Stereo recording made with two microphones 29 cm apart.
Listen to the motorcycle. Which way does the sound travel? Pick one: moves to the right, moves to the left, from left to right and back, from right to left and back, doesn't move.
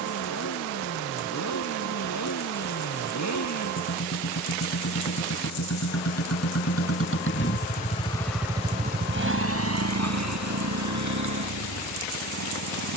moves to the right.